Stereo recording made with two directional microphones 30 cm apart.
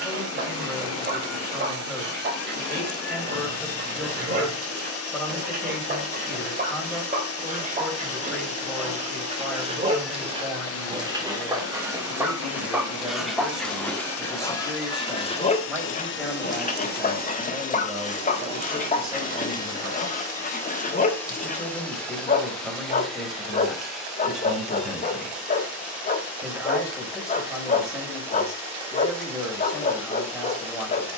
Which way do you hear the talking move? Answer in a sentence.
In this clip you hear the talking stay put.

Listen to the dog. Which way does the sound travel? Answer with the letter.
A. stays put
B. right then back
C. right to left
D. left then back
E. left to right
C.